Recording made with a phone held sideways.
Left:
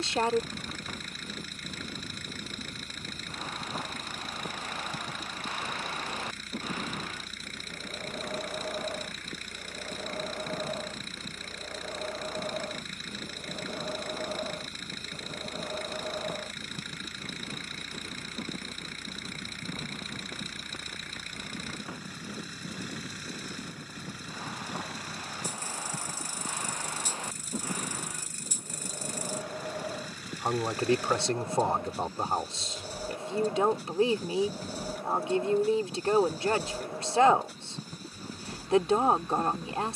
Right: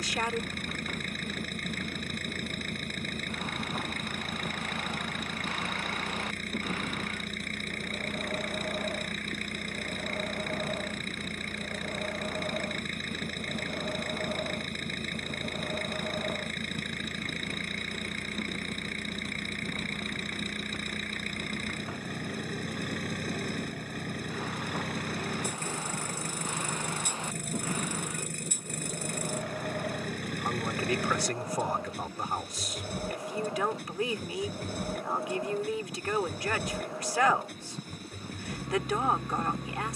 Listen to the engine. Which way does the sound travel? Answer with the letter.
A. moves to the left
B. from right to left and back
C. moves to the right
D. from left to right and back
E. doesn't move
E.